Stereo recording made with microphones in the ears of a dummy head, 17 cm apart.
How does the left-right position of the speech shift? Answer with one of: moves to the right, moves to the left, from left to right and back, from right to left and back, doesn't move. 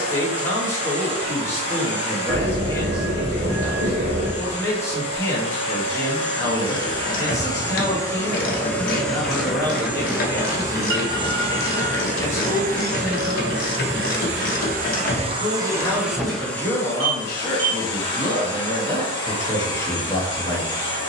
doesn't move.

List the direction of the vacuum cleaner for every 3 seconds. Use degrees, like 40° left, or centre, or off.
30° left, 30° left, 20° left, 20° right, 50° right, centre, 30° left.